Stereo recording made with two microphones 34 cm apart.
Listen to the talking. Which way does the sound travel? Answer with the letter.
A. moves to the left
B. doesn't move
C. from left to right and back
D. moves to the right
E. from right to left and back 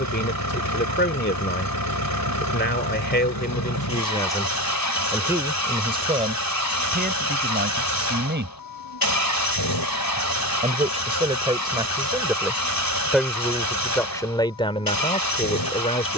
C.